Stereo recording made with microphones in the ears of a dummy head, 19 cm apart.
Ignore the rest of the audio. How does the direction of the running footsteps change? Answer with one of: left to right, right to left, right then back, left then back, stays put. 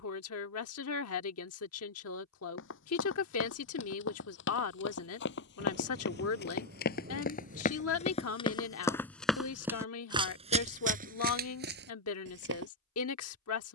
left to right.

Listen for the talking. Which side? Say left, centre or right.
left.